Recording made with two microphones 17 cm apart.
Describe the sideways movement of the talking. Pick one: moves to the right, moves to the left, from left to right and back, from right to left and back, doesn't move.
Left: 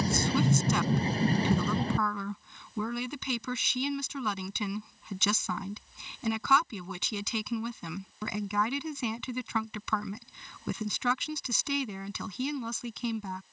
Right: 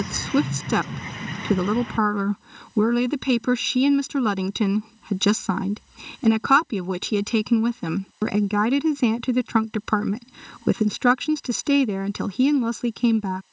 doesn't move.